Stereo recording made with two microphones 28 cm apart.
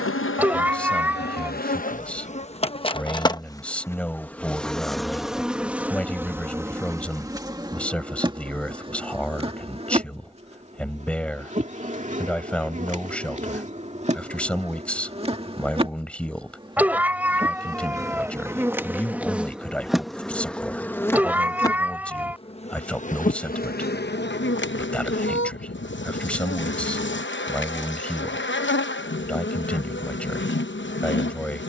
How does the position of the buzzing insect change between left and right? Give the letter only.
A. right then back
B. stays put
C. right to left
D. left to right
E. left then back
A.